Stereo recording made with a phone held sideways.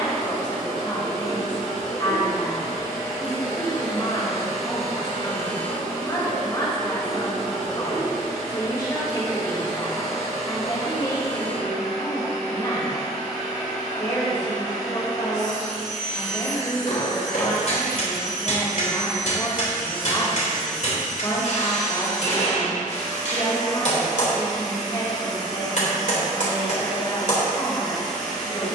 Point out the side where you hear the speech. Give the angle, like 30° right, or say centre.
30° left.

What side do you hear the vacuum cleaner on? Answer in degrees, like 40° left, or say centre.
60° left.